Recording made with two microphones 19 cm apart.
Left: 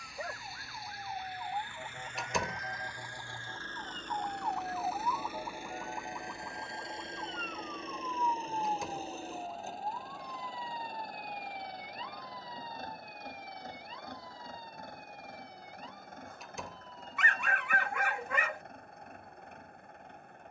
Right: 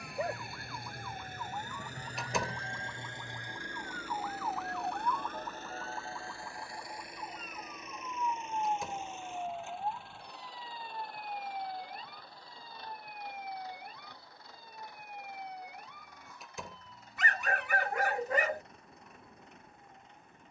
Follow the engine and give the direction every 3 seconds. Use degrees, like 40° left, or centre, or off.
40° right, centre, 30° left, 40° left, 50° left, 50° left, 50° left.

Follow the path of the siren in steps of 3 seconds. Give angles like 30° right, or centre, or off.
40° left, 20° left, 10° right, 40° right, 50° right, 60° right, 70° right.